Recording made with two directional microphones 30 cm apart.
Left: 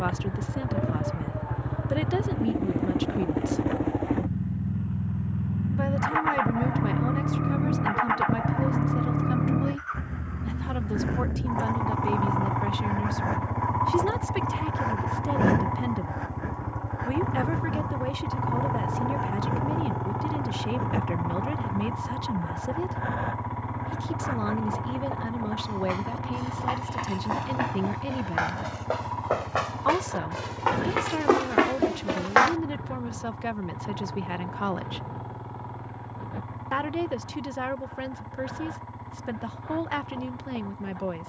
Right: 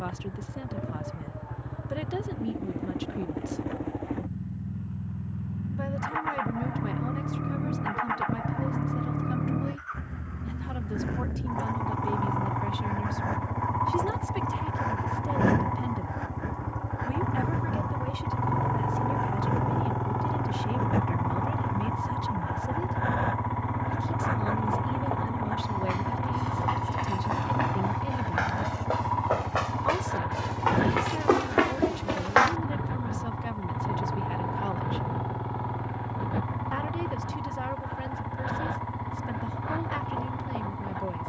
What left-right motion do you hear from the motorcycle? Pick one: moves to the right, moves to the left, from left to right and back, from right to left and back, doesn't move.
moves to the right.